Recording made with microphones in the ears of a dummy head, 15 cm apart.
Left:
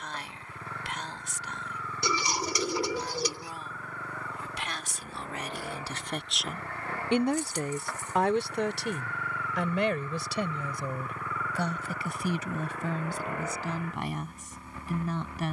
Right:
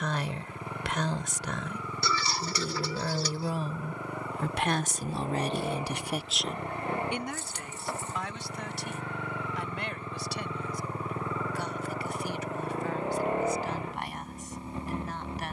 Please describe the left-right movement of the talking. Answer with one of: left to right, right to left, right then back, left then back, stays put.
right to left.